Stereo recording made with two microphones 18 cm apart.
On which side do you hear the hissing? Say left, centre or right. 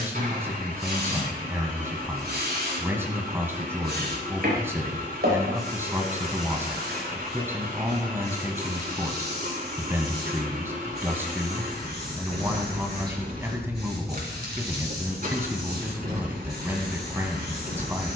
right.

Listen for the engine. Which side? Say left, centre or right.
right.